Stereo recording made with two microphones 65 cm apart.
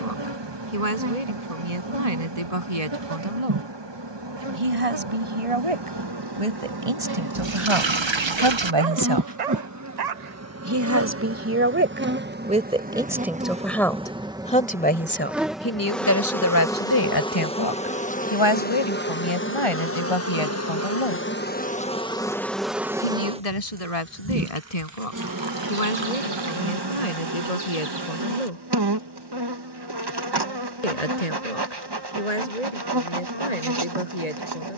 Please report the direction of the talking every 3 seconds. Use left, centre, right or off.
right, right, right, right, centre, left, left, left, left, left, left, left.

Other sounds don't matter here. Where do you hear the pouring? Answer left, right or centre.
right.